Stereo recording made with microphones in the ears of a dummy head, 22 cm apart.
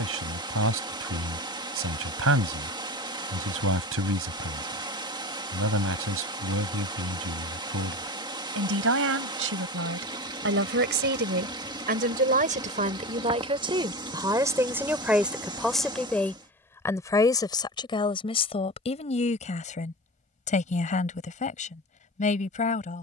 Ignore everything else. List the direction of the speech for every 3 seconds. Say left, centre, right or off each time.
right, right, right, right, right, centre, left, left.